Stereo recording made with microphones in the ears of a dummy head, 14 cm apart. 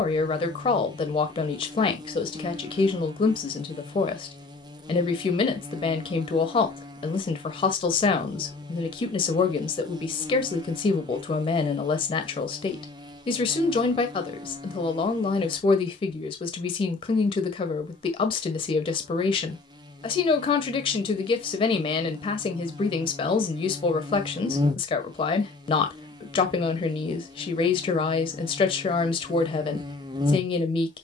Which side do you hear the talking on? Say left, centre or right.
left.